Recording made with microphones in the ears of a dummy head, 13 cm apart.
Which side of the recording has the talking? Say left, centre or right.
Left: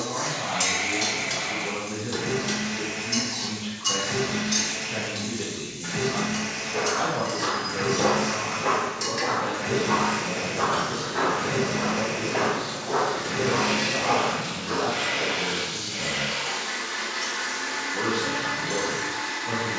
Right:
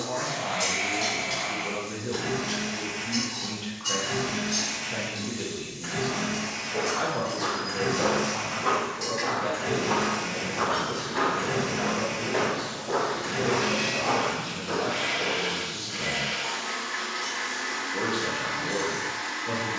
right.